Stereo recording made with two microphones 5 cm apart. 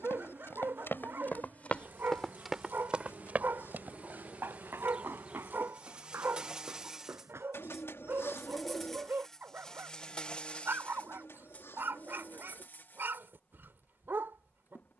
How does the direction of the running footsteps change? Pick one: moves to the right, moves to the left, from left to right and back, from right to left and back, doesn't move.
moves to the right.